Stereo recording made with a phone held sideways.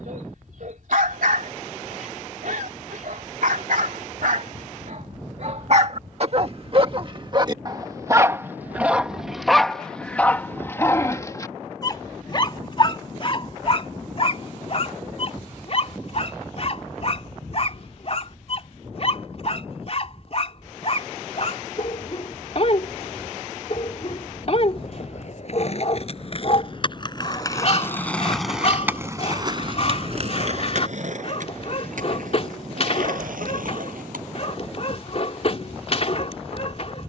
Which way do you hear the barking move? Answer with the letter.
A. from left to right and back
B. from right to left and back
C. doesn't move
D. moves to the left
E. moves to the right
D.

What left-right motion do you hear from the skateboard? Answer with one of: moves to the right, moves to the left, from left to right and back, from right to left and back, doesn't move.
moves to the right.